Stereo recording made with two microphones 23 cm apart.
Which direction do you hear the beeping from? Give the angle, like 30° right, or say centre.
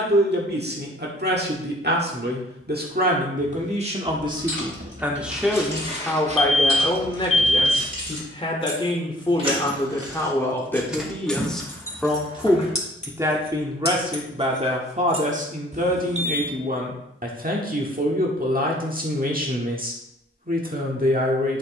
30° right.